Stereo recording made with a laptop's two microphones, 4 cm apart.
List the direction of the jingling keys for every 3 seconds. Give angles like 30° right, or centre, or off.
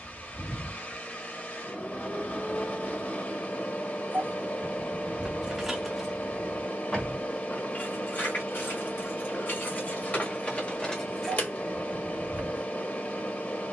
off, 10° right, 40° left, 30° left, 30° right.